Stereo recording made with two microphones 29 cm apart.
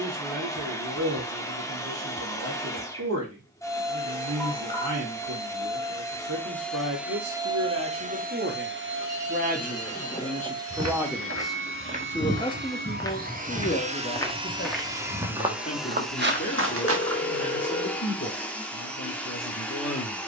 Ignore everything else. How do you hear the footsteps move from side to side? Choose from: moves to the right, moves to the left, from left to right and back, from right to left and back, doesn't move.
from right to left and back.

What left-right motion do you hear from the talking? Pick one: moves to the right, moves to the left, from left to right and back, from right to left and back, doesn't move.
moves to the left.